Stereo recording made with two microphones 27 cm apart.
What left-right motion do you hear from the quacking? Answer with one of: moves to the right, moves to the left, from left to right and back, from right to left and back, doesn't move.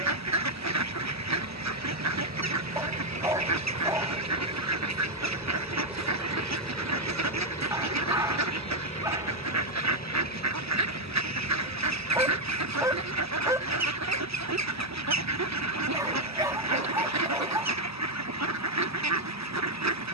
doesn't move.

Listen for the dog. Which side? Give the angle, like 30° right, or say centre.
10° right.